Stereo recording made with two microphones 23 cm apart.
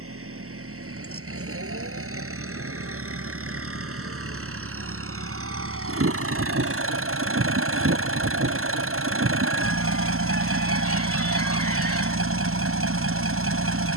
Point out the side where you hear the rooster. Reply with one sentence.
You can hear the rooster on the left.